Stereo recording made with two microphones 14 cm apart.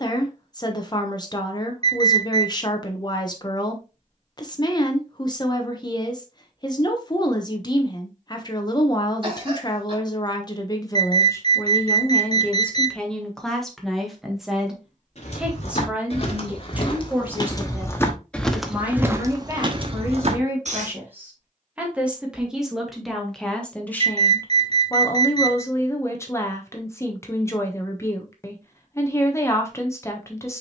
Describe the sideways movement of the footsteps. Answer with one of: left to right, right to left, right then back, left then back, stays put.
left to right.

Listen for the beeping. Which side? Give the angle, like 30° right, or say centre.
50° right.